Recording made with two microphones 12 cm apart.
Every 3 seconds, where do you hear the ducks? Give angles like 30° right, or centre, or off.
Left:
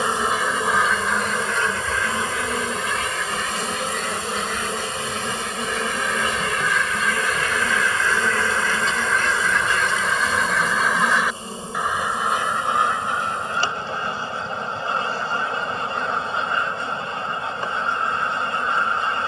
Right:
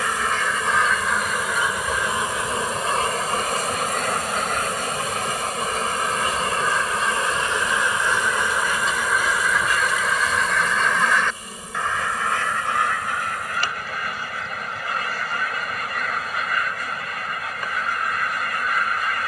10° right, 50° right, 30° right, centre, 30° left, 30° left, 30° left.